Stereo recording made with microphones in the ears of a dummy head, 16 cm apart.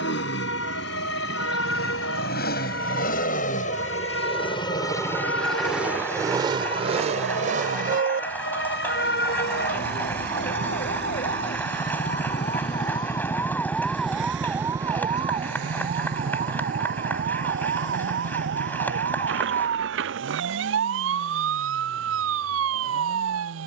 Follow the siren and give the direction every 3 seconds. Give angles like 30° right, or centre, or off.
80° left, 70° left, 70° left, 50° left, 10° left, 40° right, 60° right, 70° right.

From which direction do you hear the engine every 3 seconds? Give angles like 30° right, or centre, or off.
70° left, 30° left, 40° right, 70° right, 80° right, 80° right, 80° right, 80° right.